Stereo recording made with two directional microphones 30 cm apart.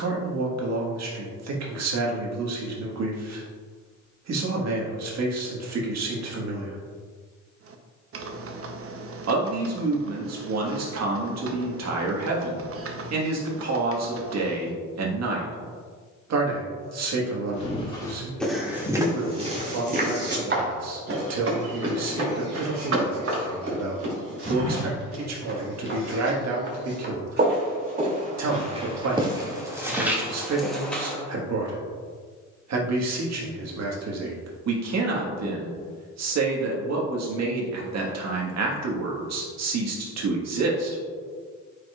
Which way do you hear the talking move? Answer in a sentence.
In this clip you hear the talking stay put.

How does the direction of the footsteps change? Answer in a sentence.
In this clip you hear the footsteps move from left to right and back again.